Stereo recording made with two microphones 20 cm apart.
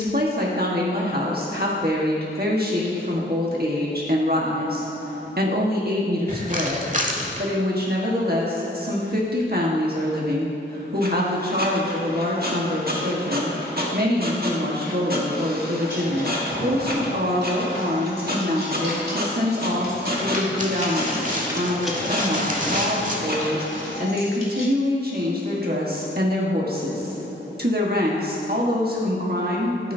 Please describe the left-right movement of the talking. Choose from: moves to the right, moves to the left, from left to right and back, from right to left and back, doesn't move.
doesn't move.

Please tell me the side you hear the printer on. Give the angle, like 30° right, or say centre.
50° right.